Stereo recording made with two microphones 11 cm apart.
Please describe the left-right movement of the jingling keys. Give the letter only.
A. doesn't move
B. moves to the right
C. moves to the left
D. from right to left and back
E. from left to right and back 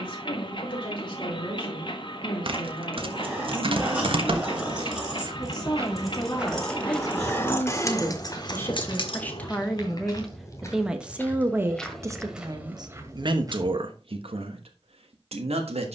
C.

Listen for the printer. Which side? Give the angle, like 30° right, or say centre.
50° left.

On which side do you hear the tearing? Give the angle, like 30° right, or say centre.
50° right.